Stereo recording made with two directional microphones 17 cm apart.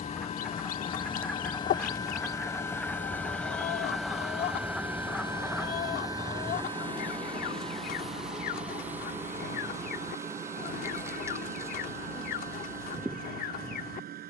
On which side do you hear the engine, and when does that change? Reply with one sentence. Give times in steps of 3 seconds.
You can hear the engine on the left from 0 s, in the centre from 3 s and on the right from 6 s.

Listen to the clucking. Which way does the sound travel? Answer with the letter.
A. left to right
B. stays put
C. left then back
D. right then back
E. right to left
B.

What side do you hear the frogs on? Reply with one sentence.
In this clip you hear the frogs in the centre.